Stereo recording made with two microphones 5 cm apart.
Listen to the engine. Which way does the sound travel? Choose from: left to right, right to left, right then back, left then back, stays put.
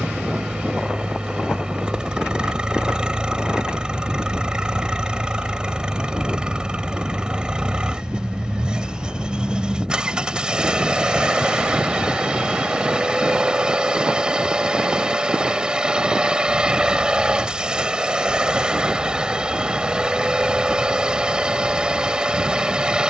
stays put.